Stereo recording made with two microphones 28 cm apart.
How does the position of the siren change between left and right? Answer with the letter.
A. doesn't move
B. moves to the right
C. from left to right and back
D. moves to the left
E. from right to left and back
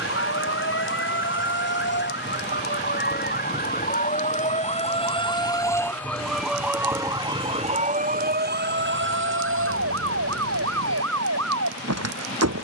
B.